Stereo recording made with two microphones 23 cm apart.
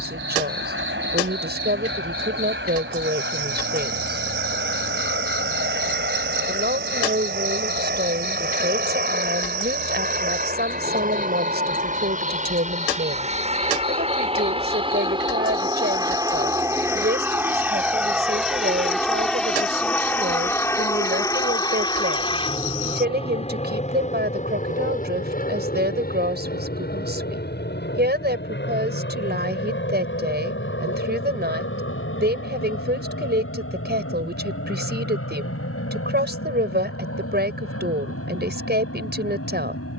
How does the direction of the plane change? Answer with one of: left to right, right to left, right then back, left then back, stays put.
right to left.